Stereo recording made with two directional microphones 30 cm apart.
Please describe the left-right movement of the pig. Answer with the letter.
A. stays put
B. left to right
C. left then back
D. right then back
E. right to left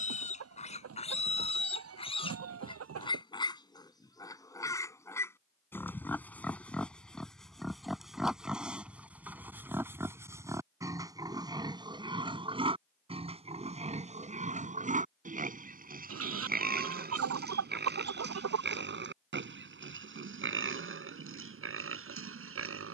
B.